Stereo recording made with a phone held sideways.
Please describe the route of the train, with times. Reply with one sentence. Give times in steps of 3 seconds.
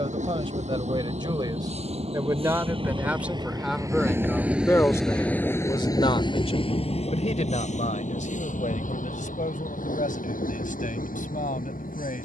In this clip you hear the train on the right from 0 s, in the centre from 3 s and on the left from 6 s.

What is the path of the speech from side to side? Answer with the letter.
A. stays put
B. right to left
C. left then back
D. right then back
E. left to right
B.